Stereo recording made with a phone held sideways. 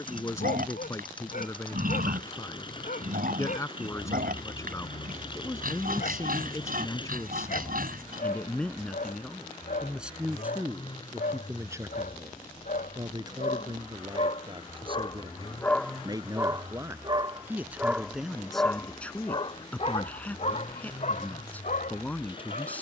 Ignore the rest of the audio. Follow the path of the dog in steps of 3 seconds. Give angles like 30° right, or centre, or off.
70° left, 70° left, 70° left, 70° left, 60° left, 10° right, 30° left, 60° left.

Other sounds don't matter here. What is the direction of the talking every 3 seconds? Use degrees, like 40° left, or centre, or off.
20° left, 20° left, 10° left, 10° right, 30° right, 20° right, 10° left, 10° left.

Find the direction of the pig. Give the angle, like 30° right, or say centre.
70° right.